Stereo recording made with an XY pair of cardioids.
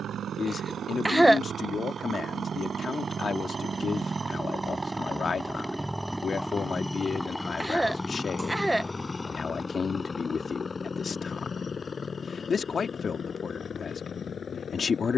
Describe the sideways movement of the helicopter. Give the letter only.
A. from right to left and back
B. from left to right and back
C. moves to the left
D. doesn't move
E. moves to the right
C.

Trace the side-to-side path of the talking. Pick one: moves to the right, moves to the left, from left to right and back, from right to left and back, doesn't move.
doesn't move.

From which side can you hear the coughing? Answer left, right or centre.
centre.